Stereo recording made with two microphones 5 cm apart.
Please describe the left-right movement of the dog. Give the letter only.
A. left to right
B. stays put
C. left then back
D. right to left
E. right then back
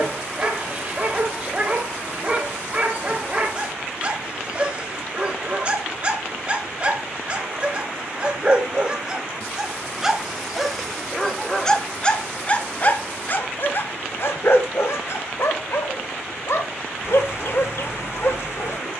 D.